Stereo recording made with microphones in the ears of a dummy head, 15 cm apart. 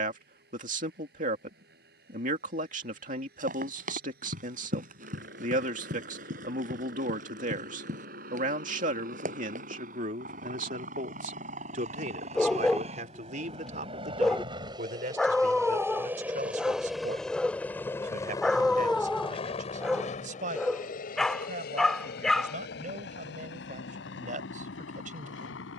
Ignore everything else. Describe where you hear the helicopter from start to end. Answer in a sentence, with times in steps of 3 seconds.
You can hear the helicopter on the right from 0 s, in the centre from 15 s and on the left from 18 s.